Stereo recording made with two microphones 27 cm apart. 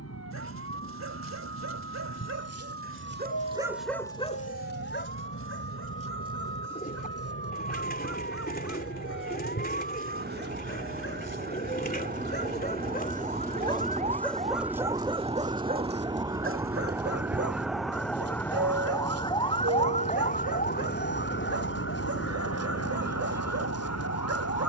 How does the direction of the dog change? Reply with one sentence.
In this clip you hear the dog move from right to left and back again.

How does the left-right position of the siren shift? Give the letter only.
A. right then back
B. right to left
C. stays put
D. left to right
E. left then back
B.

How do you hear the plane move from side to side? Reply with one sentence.
You can hear the plane move to the right.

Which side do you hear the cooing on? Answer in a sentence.
You can hear the cooing on the left.